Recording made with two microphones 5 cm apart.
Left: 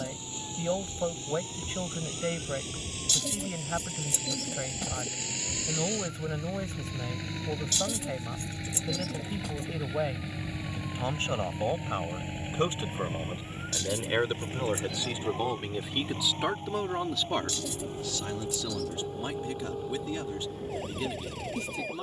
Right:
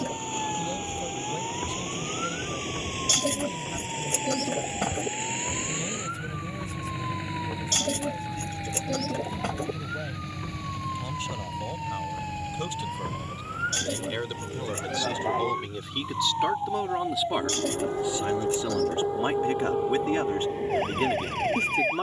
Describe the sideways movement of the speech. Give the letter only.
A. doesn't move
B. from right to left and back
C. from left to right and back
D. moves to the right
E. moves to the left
D.